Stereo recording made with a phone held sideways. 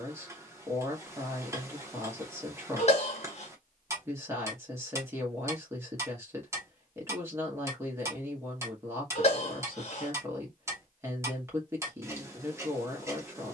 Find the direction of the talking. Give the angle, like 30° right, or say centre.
20° right.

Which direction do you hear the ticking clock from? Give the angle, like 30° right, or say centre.
20° right.